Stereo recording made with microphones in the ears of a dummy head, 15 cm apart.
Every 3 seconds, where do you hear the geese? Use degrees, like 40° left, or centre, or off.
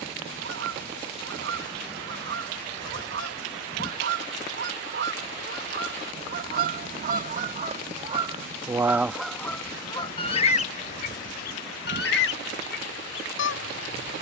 70° right, 60° right, 40° right, 30° left, 70° left.